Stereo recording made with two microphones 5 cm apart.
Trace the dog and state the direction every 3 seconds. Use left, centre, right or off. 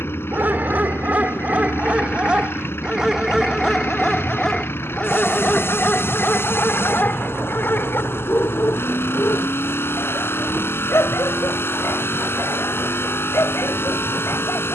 right, centre, left, left, left.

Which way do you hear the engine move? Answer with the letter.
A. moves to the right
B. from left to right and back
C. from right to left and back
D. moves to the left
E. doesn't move
E.